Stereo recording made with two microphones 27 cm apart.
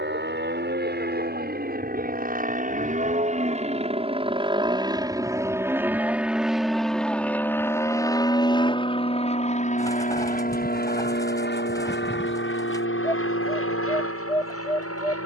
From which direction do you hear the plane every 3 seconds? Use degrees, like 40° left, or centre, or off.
40° right, 20° right, 10° left, 30° left, 50° left.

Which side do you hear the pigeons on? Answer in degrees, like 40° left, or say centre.
10° left.